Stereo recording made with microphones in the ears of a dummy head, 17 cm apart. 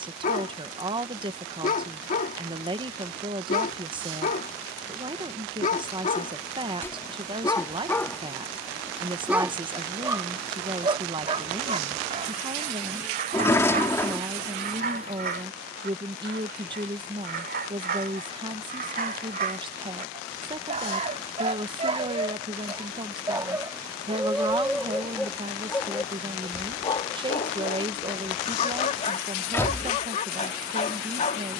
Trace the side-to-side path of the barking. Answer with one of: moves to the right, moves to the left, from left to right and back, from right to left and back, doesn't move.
from left to right and back.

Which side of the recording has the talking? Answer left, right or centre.
right.